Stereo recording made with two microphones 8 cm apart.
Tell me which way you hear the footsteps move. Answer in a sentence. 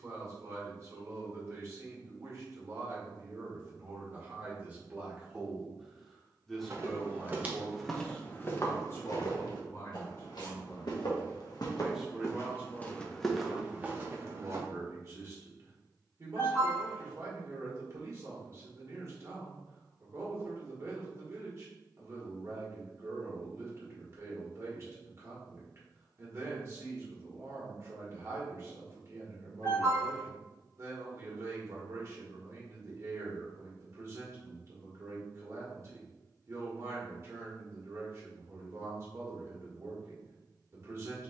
In this clip you hear the footsteps move from right to left and back again.